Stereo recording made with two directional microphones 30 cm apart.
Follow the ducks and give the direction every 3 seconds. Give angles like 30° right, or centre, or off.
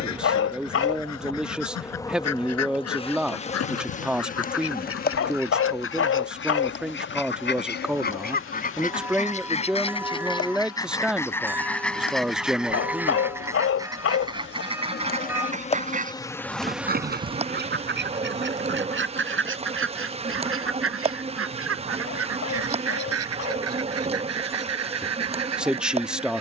60° left, 50° left, 40° left, 10° left, 10° right, 30° right, 40° right, 50° right, 60° right.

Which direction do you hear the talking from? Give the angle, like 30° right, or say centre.
centre.